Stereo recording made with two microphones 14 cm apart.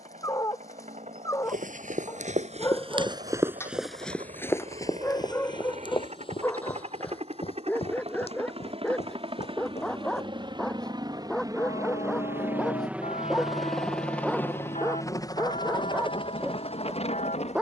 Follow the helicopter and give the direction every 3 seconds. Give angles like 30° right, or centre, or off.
60° right, 60° right, 50° right, 40° right, centre, 40° left.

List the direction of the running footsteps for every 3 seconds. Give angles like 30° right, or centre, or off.
60° right, 10° left, 50° left, 50° left, off, off.